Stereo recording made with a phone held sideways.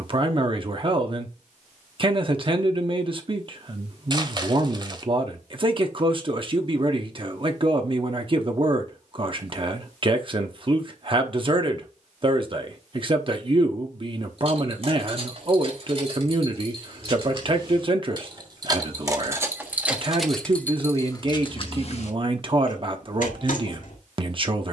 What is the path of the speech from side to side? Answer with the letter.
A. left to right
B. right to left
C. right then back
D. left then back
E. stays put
E.